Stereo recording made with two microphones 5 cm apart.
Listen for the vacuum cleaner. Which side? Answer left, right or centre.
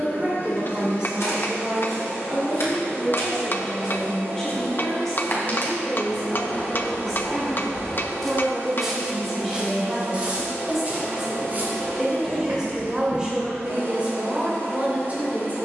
right.